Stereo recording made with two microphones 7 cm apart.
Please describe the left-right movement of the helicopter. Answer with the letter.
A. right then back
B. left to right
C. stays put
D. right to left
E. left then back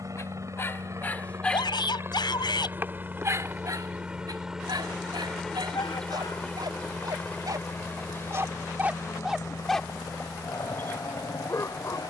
D.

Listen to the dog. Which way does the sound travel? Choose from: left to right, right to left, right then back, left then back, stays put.
right then back.